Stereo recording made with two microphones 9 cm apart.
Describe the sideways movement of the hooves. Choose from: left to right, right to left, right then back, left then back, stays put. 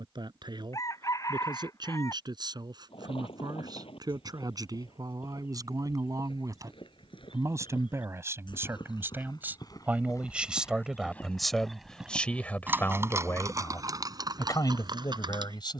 left to right.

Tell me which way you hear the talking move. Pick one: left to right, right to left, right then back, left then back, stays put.
right to left.